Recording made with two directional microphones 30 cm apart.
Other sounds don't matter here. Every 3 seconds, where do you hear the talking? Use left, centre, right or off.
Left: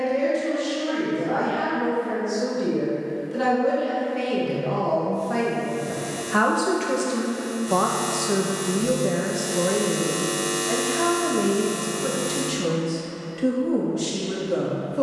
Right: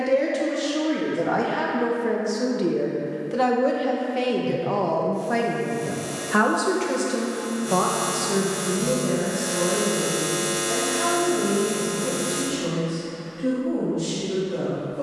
right, right, centre, left, left.